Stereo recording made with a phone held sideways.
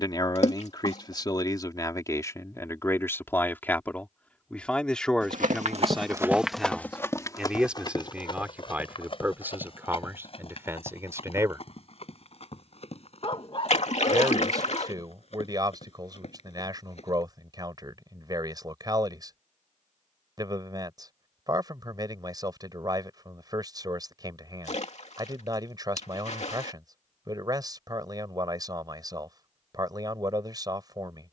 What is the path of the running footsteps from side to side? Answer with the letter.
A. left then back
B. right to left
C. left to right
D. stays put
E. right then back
B.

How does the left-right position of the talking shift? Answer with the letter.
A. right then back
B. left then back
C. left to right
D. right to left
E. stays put
C.